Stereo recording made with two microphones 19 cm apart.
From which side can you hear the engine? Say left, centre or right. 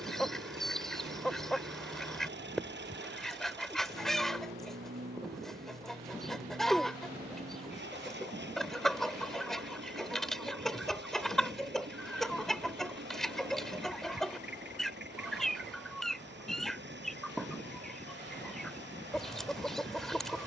right.